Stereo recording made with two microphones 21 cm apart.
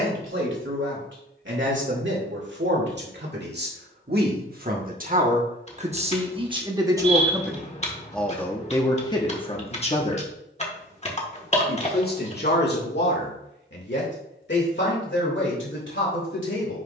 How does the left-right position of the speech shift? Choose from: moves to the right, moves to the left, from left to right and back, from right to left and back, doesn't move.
moves to the left.